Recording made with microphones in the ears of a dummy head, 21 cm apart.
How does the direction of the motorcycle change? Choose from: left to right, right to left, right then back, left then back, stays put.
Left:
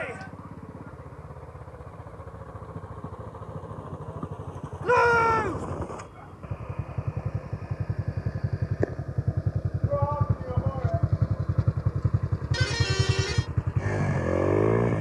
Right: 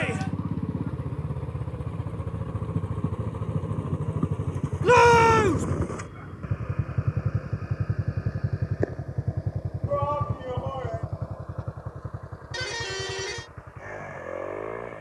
right to left.